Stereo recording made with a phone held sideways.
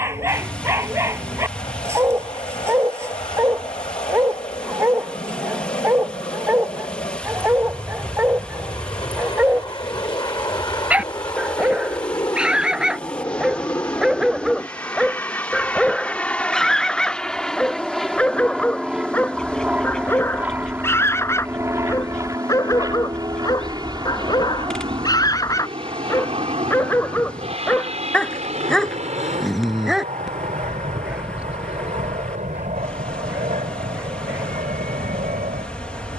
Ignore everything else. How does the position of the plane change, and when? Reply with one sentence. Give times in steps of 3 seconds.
You can hear the plane on the left from 0 s, in the centre from 15 s and on the right from 21 s.